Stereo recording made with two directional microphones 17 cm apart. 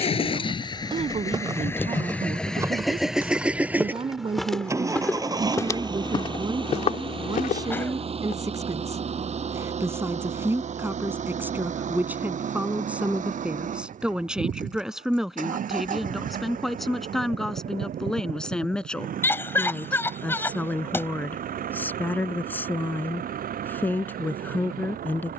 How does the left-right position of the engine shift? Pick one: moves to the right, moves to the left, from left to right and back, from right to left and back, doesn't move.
moves to the right.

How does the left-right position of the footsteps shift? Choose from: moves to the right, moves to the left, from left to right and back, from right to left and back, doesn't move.
moves to the left.